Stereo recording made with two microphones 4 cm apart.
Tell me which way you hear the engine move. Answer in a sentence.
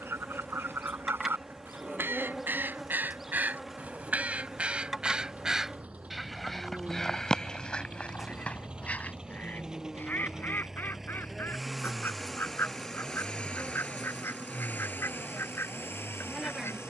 In this clip you hear the engine go from the right side to the left.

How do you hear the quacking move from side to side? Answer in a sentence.
You can hear the quacking travel towards the left.